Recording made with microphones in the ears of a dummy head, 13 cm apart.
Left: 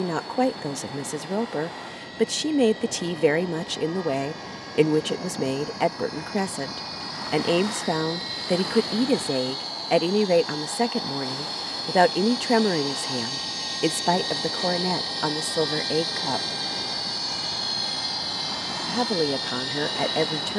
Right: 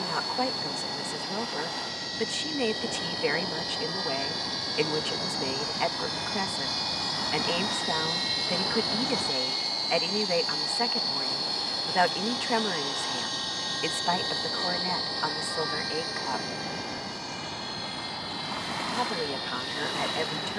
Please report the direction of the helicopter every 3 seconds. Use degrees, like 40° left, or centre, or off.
40° right, 40° right, 30° right, 10° right, 10° left, 30° left, 50° left.